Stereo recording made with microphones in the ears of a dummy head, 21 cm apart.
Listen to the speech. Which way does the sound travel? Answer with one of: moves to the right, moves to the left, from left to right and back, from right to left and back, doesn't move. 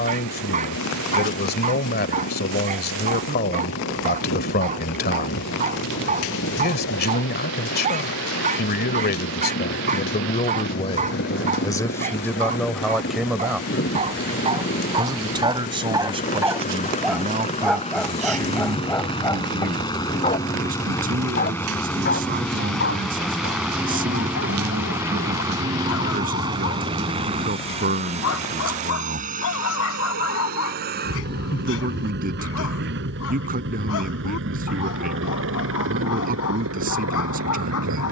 moves to the right.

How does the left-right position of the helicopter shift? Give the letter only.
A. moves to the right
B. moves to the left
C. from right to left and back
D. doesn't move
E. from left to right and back
A.